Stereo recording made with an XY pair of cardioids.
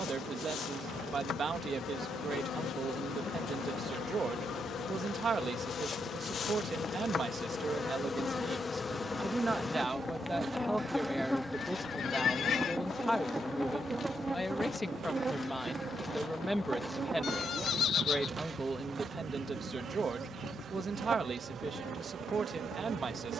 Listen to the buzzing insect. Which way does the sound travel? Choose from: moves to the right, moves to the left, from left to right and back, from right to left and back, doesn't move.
moves to the right.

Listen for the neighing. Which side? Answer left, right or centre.
left.